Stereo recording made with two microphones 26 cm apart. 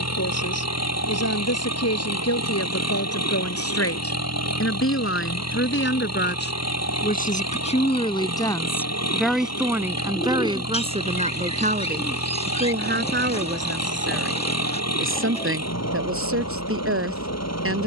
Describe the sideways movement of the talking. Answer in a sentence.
You can hear the talking move from left to right.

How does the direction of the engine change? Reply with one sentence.
In this clip you hear the engine stay in one place.